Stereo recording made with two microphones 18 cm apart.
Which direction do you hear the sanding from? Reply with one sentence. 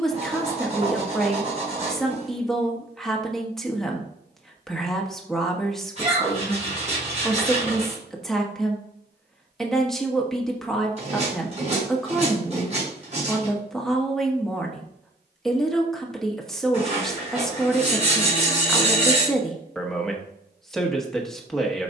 You can hear the sanding on the right.